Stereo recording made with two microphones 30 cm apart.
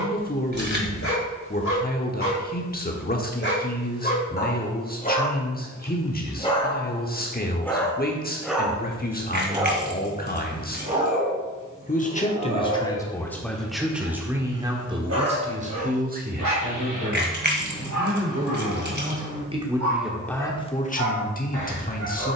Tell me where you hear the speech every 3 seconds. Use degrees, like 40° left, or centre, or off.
30° left, 30° left, 30° left, 30° left, centre, 30° right, 10° right, 30° left.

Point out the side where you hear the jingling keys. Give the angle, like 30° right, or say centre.
30° right.